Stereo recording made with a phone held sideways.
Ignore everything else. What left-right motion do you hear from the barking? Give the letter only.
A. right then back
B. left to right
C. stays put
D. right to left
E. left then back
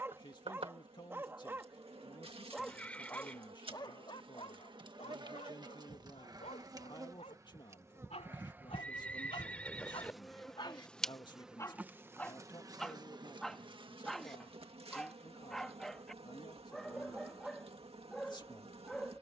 E.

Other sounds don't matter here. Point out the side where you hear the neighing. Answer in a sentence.
In this clip you hear the neighing in the centre.